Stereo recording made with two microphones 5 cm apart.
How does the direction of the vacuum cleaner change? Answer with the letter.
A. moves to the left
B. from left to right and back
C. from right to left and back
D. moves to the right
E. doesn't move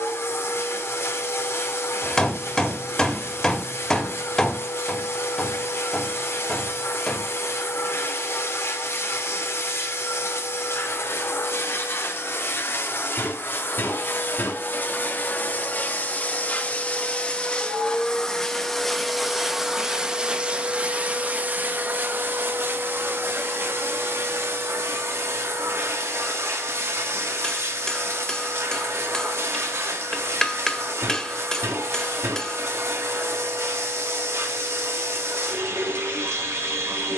D.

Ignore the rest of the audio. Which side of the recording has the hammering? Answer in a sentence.
You can hear the hammering in the centre.